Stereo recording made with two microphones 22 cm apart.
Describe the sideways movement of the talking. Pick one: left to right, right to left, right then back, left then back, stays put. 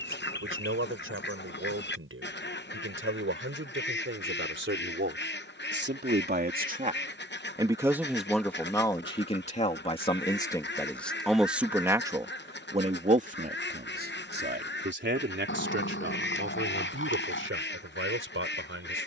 left then back.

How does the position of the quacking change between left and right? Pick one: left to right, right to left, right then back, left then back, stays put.
stays put.